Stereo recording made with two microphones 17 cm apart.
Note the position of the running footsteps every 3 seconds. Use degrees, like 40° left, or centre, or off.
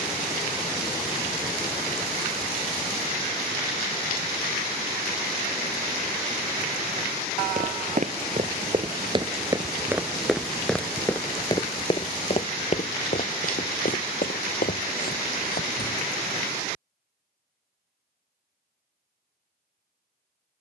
off, off, 40° right, centre, 50° left, 60° left, off.